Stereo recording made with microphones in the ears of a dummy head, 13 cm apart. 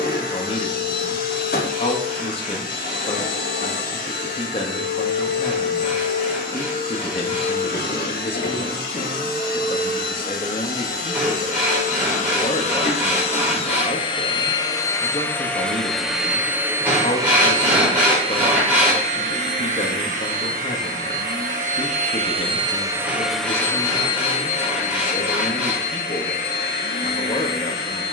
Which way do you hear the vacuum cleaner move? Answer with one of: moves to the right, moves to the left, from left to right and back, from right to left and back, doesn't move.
from left to right and back.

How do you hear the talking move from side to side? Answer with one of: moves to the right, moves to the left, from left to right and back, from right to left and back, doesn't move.
doesn't move.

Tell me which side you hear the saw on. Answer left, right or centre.
centre.